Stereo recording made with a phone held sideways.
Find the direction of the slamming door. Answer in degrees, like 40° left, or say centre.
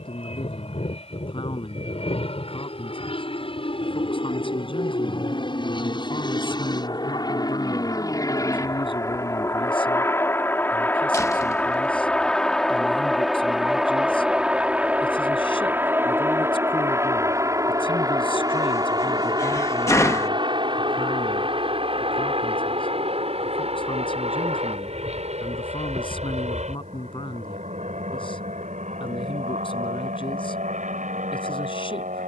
20° left.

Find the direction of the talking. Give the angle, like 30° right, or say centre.
40° left.